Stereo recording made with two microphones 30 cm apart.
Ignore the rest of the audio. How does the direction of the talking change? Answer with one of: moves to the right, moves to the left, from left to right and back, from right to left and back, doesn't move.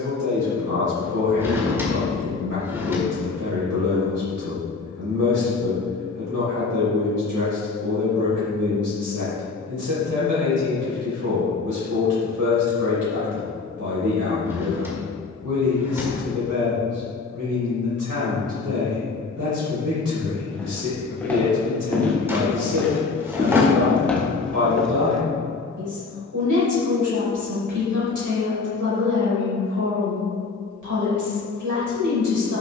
doesn't move.